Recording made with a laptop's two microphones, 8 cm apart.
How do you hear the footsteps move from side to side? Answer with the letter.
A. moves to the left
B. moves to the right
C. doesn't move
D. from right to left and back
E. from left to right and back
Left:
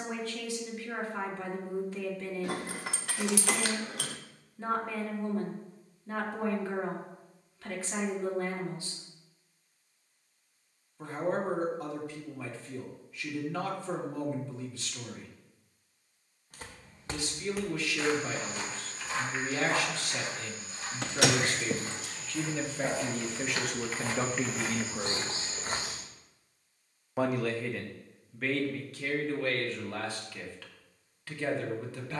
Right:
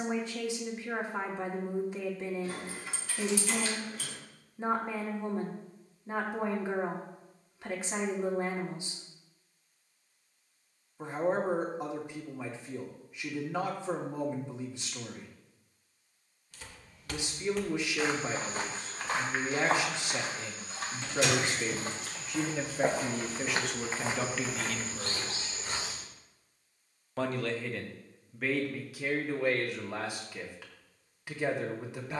E.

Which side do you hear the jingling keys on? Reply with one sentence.
You can hear the jingling keys on the left.